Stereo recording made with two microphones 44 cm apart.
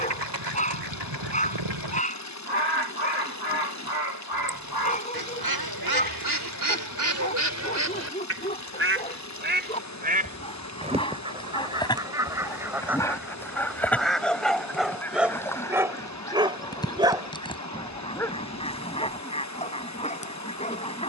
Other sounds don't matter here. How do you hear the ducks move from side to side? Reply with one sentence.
You can hear the ducks travel towards the left.